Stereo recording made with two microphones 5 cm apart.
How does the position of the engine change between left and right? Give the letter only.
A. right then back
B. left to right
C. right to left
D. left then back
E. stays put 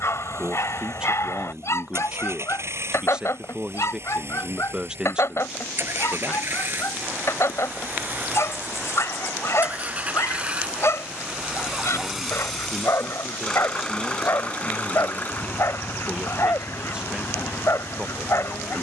C.